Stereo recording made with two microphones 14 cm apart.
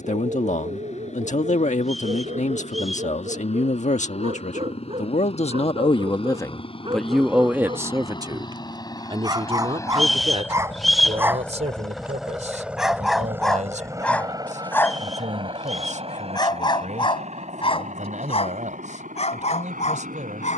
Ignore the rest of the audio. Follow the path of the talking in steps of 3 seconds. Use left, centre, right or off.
left, left, centre, right, right, right, right.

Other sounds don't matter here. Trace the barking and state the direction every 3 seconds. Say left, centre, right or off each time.
right, right, right, right, centre, left, left.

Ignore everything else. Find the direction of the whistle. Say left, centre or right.
centre.